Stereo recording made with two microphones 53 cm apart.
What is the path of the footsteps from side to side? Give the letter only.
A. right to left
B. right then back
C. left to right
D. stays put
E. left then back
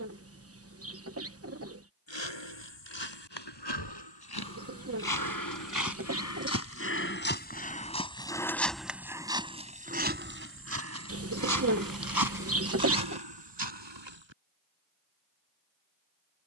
C.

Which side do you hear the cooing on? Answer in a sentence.
In this clip you hear the cooing on the right.